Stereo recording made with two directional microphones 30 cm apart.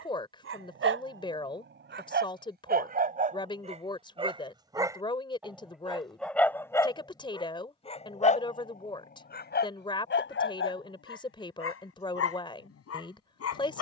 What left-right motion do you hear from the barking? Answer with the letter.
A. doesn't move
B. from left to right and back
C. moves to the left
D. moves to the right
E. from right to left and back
C.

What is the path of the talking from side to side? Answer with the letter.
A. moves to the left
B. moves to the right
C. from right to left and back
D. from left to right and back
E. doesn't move
E.